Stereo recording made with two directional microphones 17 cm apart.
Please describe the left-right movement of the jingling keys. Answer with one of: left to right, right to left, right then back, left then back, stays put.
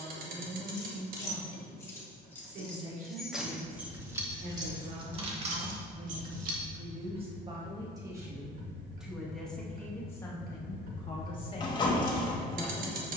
left to right.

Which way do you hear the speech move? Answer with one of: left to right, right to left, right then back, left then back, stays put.
right to left.